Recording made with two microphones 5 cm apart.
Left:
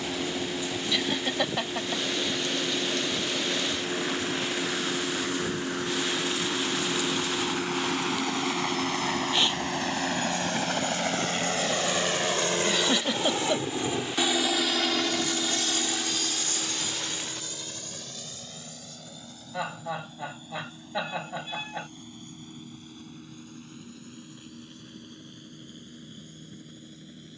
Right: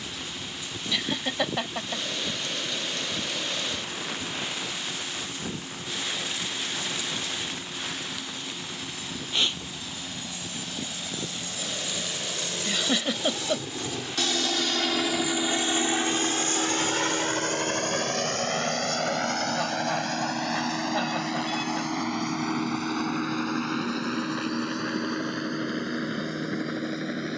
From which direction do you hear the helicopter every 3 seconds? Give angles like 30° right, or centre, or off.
80° left, 80° left, 70° left, 60° left, 30° left, 30° right, 60° right, 80° right, 80° right.